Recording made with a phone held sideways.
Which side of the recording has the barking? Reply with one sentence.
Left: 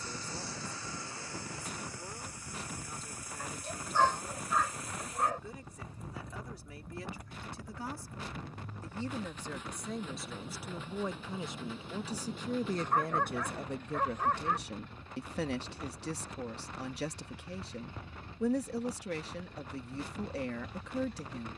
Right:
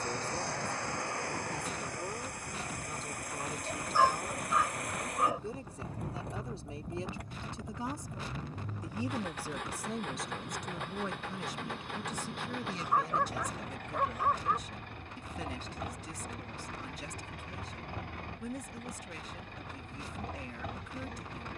You can hear the barking in the centre.